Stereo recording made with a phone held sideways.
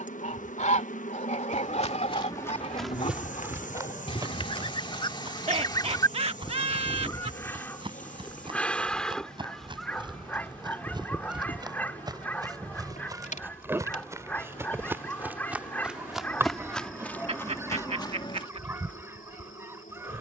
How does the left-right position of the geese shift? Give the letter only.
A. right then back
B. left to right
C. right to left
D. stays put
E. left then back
B.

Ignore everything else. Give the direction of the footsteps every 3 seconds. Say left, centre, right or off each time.
left, right, right, right, right, centre, left.